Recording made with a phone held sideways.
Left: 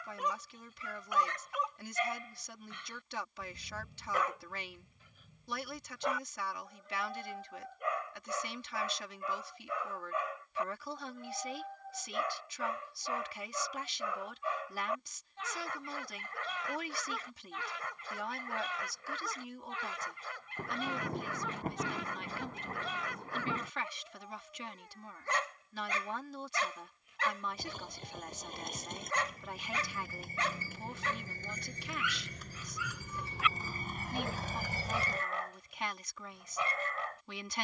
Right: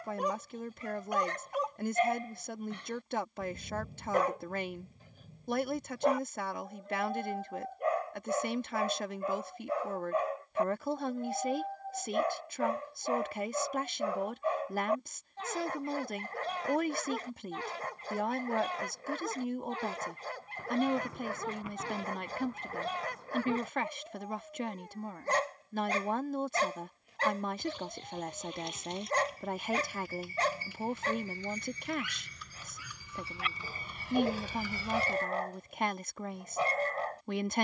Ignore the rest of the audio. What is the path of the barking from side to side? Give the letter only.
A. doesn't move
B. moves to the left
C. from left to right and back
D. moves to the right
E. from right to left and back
A.